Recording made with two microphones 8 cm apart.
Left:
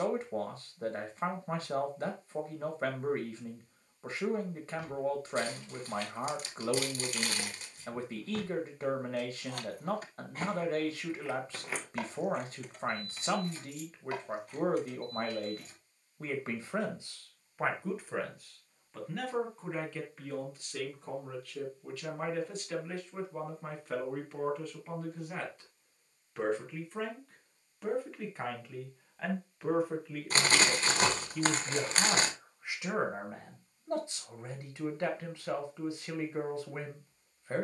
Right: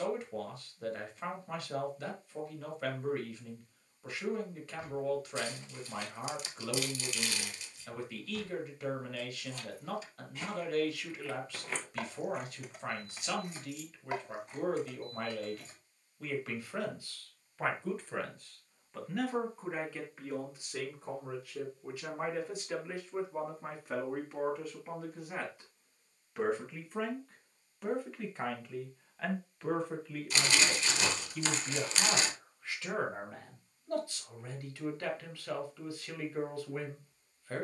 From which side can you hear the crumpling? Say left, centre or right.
left.